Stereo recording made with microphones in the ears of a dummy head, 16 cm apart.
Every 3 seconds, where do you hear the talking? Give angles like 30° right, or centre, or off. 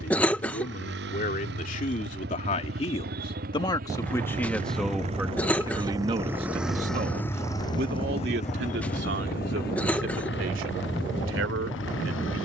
40° left, centre, 50° right, 70° right.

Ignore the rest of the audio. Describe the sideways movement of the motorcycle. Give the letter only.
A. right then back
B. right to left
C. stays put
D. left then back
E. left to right
B.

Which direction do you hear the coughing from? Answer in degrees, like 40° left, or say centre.
10° left.